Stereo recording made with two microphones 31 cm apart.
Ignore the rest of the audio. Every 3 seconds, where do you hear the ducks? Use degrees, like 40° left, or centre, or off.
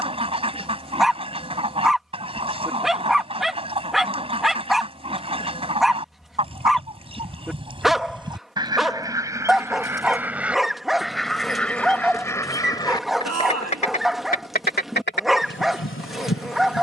20° right, 20° right, 20° right, centre, 20° left, 40° left.